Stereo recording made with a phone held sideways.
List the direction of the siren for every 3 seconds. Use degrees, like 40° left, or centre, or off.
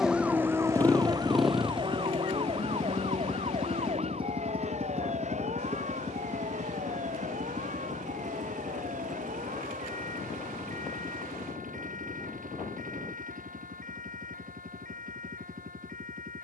30° right, 40° right, 50° right, 50° right, 50° right, 50° right.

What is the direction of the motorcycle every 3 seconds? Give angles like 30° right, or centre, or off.
centre, 30° right, 50° right, 60° right, 60° right, 60° right.